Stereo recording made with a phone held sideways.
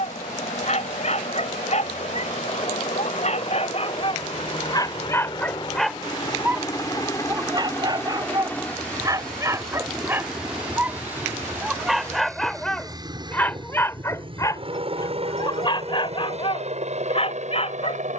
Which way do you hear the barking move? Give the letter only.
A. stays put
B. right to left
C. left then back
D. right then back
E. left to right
D.